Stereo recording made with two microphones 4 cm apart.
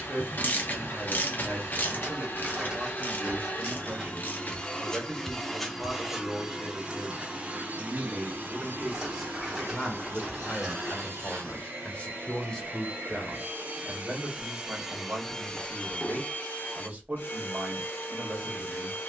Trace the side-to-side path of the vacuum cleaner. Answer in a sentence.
In this clip you hear the vacuum cleaner move from left to right and back again.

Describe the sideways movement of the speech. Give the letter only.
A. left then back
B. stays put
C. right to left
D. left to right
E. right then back
A.